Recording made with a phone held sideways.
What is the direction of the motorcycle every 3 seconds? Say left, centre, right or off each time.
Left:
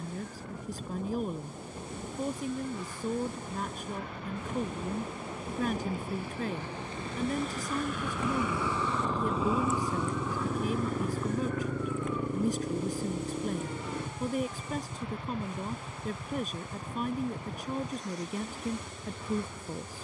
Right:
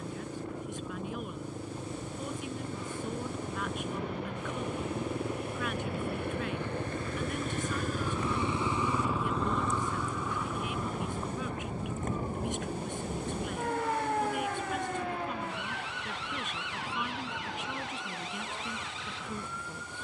right, right, right, left, left, left, left.